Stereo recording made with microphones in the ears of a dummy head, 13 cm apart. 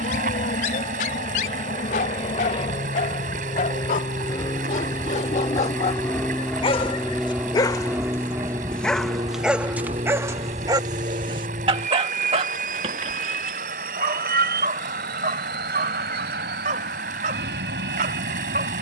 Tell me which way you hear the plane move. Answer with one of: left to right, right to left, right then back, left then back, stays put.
left to right.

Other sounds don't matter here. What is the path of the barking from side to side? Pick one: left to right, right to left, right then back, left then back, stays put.
left to right.